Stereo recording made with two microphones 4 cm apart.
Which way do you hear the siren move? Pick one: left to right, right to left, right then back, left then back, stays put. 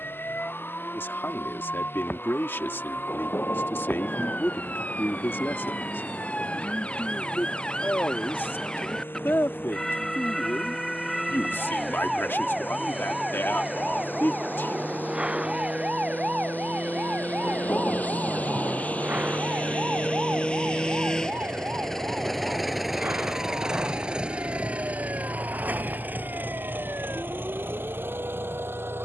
left to right.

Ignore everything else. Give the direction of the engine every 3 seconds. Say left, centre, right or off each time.
left, left, left, left, left, left, left, centre, right, right.